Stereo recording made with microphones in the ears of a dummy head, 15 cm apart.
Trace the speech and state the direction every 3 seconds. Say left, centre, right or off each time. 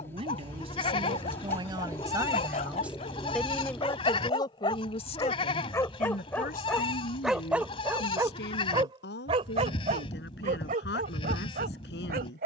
right, left, left, left.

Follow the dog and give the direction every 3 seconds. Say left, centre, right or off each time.
left, left, centre, right.